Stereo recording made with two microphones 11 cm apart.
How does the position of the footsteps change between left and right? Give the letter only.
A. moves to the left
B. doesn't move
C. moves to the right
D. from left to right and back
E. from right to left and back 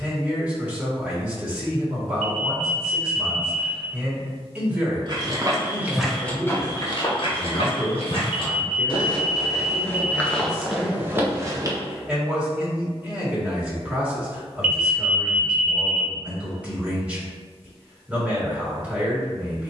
E.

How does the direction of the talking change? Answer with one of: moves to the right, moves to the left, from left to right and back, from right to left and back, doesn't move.
doesn't move.